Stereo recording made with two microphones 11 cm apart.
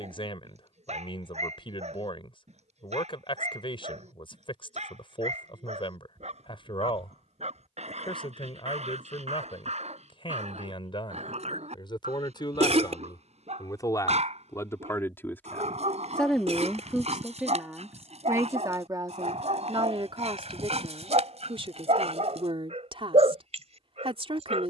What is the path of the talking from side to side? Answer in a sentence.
In this clip you hear the talking move from left to right.